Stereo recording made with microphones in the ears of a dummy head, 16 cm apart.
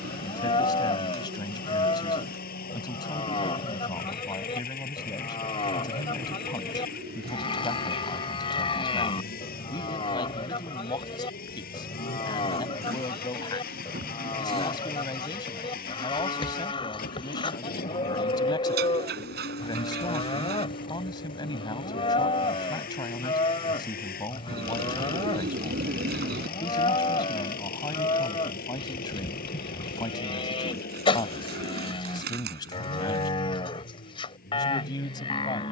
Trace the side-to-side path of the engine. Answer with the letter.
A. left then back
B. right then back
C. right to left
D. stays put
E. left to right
D.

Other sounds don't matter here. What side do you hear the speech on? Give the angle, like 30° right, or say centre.
20° left.